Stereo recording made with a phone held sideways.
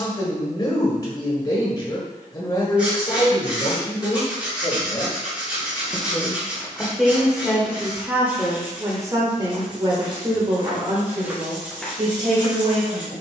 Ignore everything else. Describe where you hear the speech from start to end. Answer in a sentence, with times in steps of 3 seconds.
You can hear the speech on the left from 0 s, in the centre from 6 s and on the right from 9 s.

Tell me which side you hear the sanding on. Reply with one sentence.
In this clip you hear the sanding in the centre.